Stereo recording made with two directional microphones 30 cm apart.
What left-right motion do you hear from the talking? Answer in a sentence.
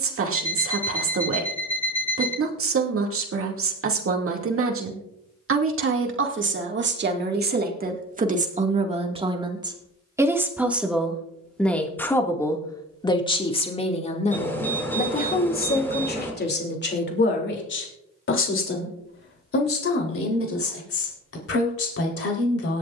You can hear the talking go from the right side to the left.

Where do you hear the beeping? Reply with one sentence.
You can hear the beeping in the centre.